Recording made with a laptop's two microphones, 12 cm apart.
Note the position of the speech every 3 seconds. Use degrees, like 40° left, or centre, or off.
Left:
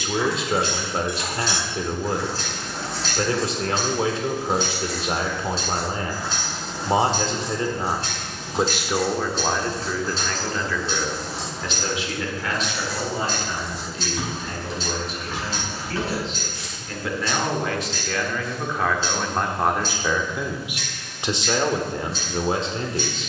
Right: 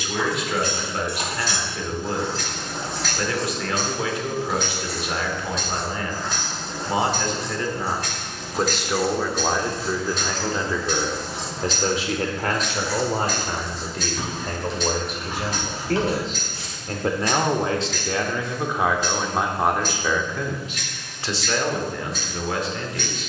30° left, 30° left, 20° left, 20° right, 50° right, 40° right, 10° right, 30° left.